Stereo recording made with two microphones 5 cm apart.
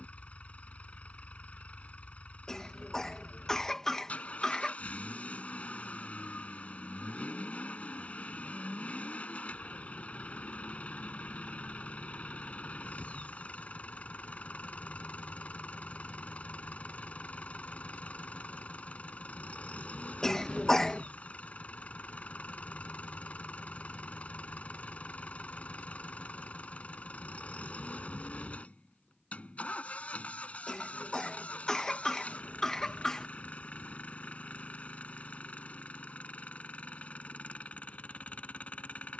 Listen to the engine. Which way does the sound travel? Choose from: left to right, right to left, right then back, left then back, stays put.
stays put.